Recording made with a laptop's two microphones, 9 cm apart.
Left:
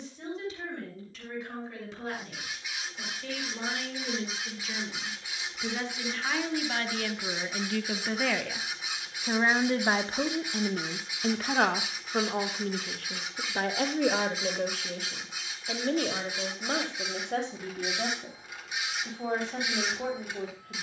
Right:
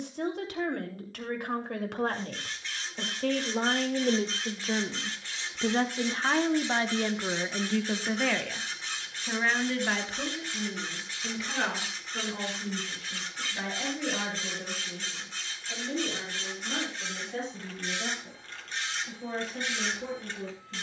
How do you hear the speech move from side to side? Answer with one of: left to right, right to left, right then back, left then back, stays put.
right to left.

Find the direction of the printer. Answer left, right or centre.
centre.